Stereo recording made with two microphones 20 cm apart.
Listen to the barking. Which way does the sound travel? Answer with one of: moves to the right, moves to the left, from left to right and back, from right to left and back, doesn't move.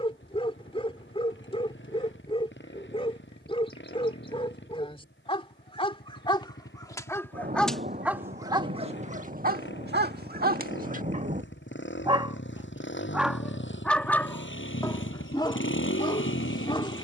from left to right and back.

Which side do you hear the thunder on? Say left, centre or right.
right.